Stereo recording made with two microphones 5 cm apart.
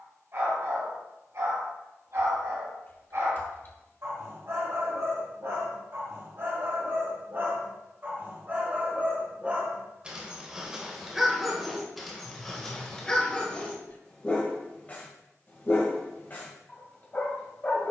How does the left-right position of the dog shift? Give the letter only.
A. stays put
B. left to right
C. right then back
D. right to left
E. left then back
D.